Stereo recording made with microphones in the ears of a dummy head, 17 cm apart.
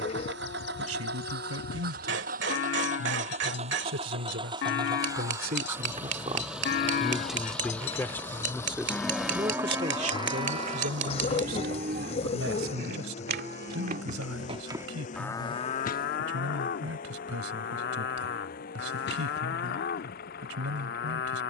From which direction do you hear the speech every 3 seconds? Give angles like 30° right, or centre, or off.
80° right, 60° right, centre, 50° right, 80° right, 80° right, 80° right.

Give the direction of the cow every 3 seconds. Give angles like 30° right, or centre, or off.
60° left, 60° left, 40° left, 30° right, 40° right, 50° left, 60° left.